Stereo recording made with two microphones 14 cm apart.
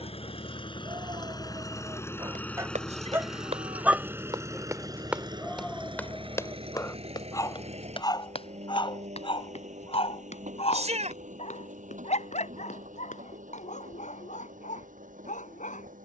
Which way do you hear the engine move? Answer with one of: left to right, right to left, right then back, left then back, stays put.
left to right.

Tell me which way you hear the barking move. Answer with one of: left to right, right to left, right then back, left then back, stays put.
right to left.